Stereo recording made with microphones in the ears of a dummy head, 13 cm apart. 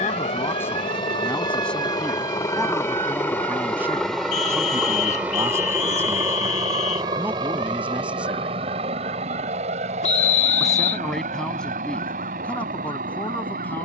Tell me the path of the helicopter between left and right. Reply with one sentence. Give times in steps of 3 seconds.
You can hear the helicopter on the left from 0 s, in the centre from 3 s and on the right from 6 s.